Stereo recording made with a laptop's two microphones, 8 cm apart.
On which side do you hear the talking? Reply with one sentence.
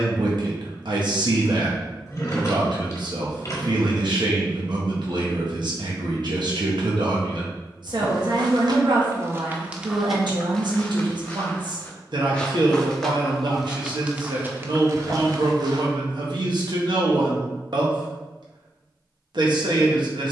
In this clip you hear the talking on the right.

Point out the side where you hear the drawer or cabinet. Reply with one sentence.
You can hear the drawer or cabinet on the left.